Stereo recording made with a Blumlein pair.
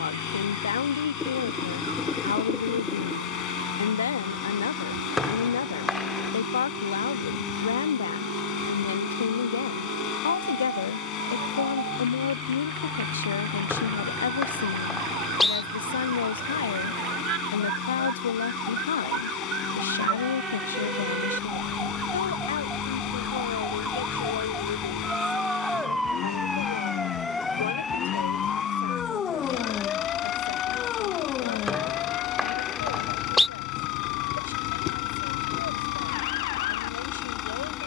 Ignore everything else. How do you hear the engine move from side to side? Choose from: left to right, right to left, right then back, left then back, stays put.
stays put.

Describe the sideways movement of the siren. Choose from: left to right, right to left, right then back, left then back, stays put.
right to left.